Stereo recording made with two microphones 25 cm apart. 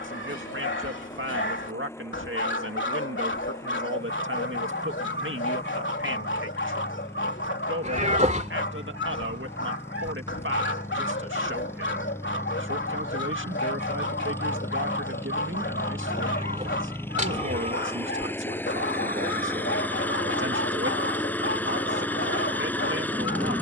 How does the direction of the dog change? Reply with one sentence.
In this clip you hear the dog stay in one place.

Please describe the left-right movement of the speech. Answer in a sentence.
In this clip you hear the speech stay put.